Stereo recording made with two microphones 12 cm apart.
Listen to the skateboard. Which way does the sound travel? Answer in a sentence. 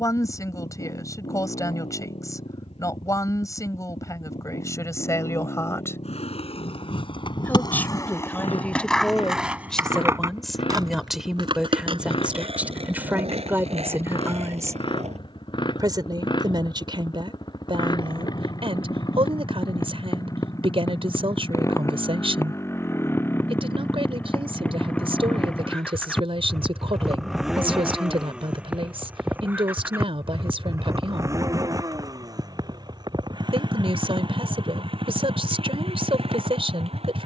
In this clip you hear the skateboard go from the left side to the right.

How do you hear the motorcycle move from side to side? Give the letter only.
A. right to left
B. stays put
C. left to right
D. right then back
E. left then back
C.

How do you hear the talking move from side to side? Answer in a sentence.
In this clip you hear the talking move to the right.